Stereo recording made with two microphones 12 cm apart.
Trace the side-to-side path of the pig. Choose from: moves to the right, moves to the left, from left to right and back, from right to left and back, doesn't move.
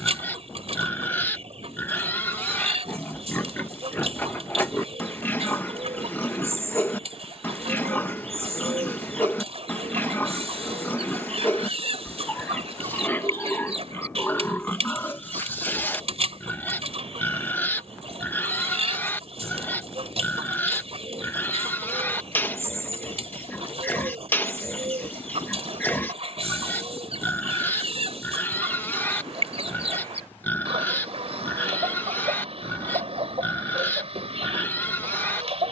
doesn't move.